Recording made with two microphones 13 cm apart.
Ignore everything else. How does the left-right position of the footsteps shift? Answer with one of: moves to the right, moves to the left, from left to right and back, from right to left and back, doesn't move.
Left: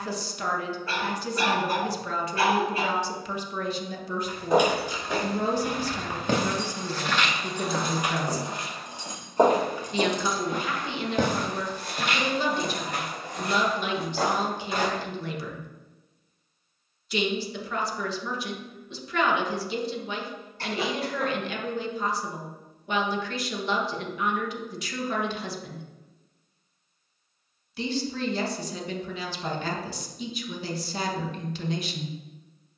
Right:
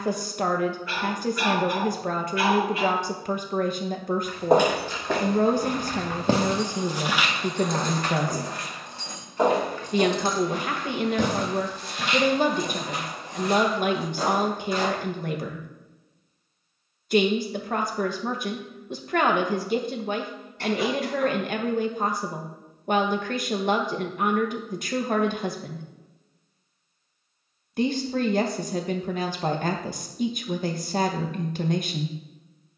moves to the left.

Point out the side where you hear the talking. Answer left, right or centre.
right.